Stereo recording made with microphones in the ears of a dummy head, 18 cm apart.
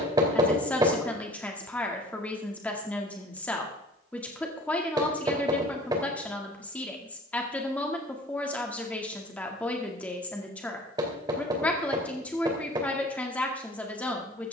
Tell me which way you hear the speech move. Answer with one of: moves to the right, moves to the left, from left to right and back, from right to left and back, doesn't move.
doesn't move.